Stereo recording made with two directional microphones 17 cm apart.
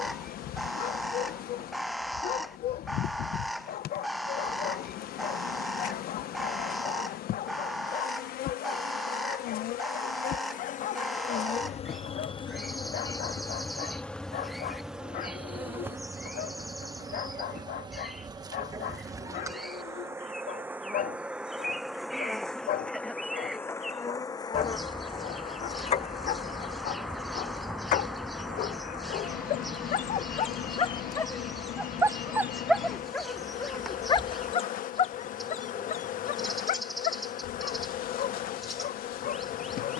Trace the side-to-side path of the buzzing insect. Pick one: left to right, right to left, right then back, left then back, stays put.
right then back.